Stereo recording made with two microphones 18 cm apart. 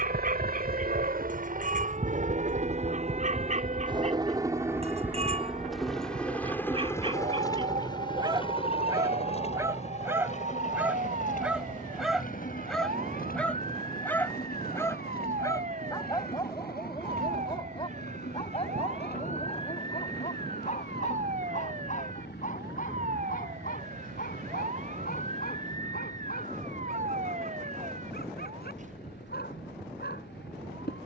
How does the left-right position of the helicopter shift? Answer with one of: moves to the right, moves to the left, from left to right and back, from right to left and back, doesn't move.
moves to the left.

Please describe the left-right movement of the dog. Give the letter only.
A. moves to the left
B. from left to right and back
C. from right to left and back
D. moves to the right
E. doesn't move
A.